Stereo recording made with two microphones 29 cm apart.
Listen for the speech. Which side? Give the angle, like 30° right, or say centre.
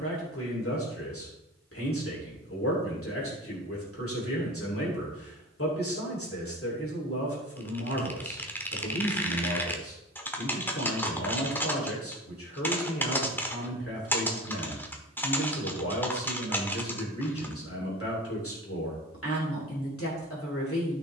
50° left.